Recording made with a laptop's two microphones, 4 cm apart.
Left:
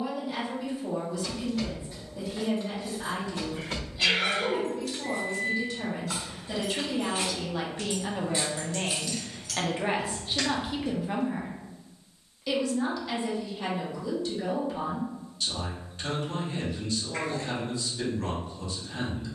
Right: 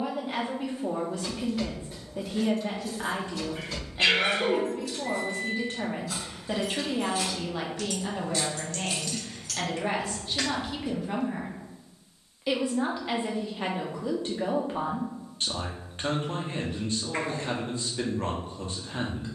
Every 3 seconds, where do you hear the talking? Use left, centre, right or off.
right, right, centre, centre, right, right, right.